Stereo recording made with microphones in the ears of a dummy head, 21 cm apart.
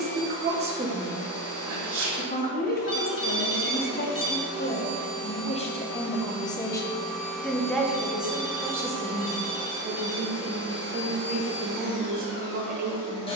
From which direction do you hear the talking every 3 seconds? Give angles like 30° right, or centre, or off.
centre, 40° left, centre, 30° right, 40° right.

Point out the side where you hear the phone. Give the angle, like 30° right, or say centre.
20° left.